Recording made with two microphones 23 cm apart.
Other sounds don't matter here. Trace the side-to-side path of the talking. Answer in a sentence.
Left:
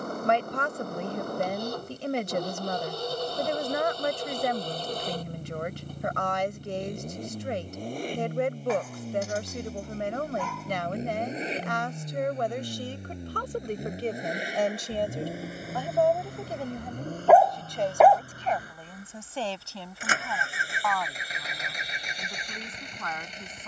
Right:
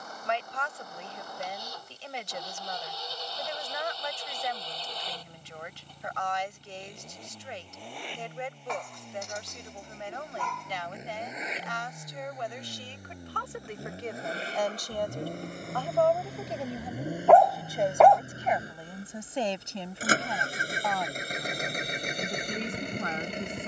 In this clip you hear the talking move from left to right.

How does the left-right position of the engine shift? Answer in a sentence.
You can hear the engine move to the right.